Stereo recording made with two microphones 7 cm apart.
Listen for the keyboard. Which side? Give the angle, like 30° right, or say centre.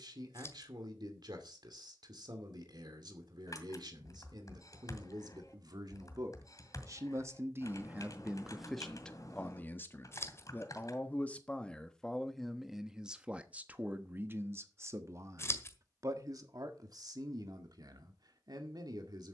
50° left.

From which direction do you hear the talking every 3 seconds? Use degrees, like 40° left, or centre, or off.
70° right, 70° right, 30° right, 20° left, 20° right, 50° right, 60° right.